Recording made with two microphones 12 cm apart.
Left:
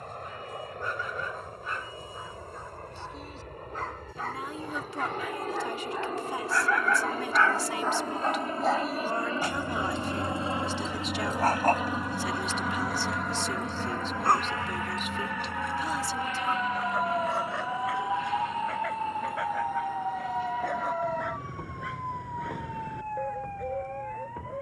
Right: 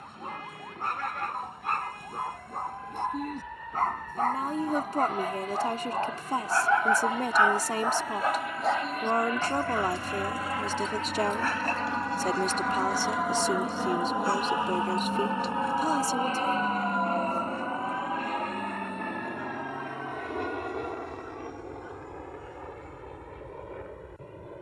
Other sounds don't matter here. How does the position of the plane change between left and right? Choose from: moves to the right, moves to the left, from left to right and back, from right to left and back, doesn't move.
moves to the right.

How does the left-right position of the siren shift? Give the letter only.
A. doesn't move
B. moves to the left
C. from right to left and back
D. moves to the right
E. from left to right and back
B.